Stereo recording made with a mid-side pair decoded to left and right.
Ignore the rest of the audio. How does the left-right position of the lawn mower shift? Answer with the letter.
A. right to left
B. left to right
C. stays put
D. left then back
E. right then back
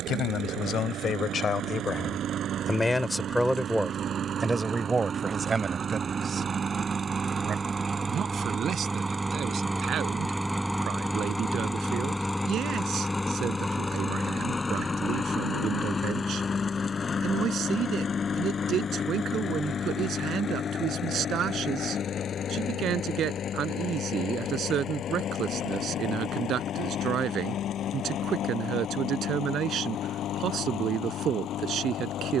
A.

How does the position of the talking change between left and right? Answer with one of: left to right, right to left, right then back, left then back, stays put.
left to right.